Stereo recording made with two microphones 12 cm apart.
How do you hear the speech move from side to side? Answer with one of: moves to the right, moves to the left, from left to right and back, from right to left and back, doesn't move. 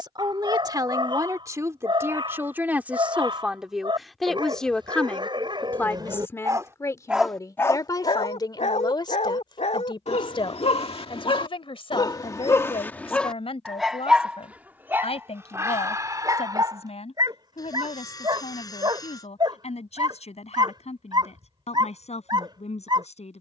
moves to the left.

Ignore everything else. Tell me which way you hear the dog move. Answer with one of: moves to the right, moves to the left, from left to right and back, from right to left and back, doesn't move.
from right to left and back.